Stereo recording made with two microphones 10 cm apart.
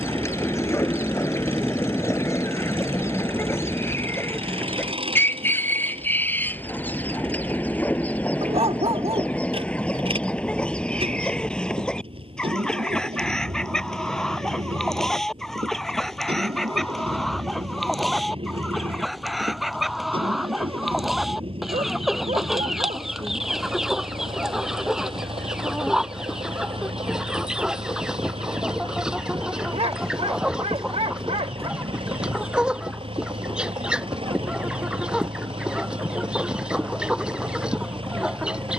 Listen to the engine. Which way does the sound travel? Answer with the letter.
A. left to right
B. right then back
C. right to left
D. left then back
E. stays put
E.